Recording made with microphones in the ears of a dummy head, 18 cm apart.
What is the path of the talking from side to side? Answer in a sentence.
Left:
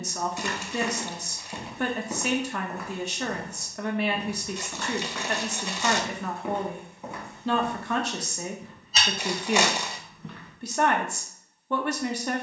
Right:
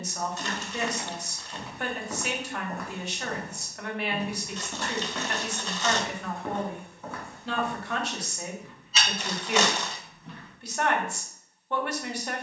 You can hear the talking stay in one place.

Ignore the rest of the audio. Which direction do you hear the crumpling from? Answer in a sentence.
You can hear the crumpling in the centre.